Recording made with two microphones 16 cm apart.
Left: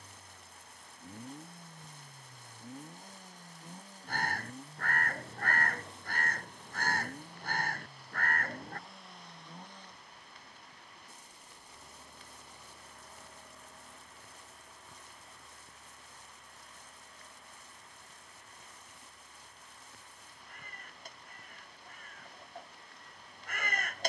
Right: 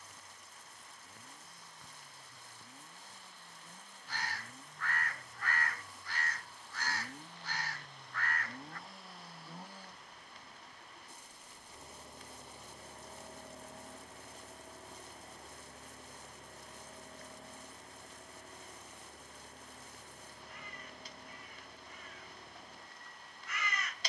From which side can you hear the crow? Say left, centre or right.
left.